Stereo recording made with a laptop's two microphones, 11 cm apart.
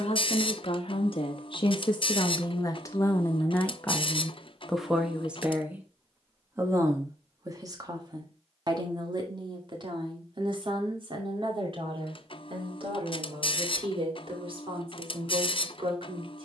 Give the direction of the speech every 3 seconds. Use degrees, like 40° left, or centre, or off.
50° left, centre, 30° right, 50° right, 50° right, 50° right.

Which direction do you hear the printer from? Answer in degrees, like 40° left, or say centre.
50° left.